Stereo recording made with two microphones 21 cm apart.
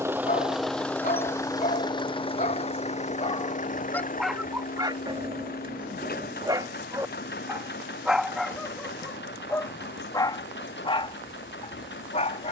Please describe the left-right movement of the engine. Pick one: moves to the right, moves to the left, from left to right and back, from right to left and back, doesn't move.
moves to the left.